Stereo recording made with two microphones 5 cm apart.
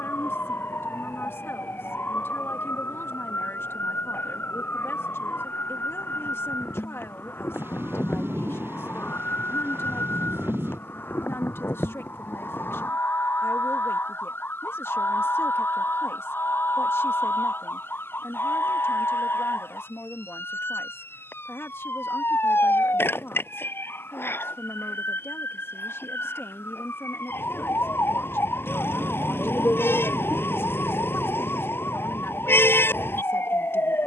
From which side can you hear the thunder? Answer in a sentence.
You can hear the thunder on the right.